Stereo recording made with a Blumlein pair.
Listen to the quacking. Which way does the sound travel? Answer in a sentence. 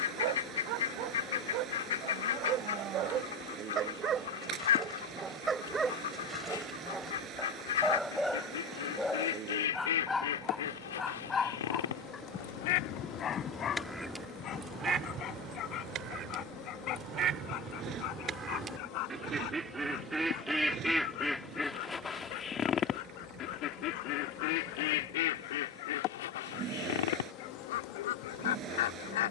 In this clip you hear the quacking go right and come back.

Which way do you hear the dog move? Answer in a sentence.
In this clip you hear the dog go from the right side to the left.